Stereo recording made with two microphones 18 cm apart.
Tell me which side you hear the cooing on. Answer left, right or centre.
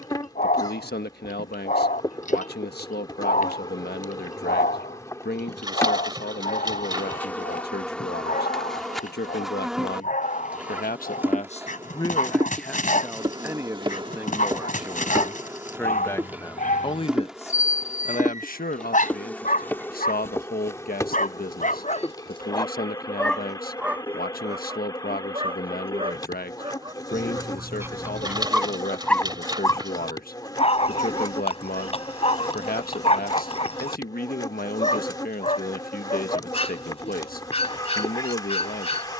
right.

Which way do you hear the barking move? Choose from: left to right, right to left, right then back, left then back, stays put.
right then back.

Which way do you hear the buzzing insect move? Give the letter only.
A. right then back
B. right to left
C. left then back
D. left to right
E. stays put
A.